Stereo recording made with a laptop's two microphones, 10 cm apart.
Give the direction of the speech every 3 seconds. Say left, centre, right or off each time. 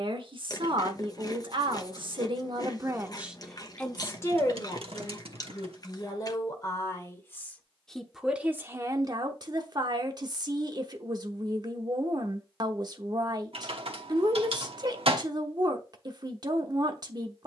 right, left, centre, right, right, right.